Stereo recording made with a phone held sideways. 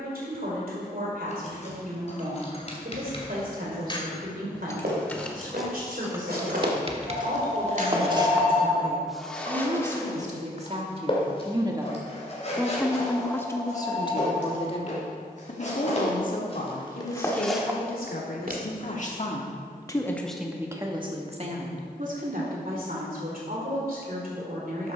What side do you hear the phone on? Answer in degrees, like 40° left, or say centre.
10° left.